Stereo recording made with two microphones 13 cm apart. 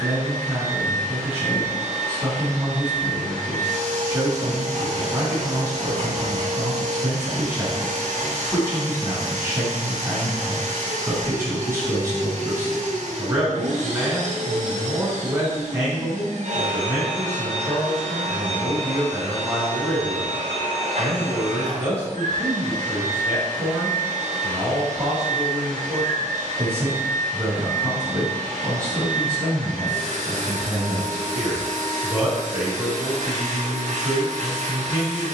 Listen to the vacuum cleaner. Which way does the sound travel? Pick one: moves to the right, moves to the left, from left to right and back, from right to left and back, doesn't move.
doesn't move.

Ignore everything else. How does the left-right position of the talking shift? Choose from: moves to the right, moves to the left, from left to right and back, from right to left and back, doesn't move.
doesn't move.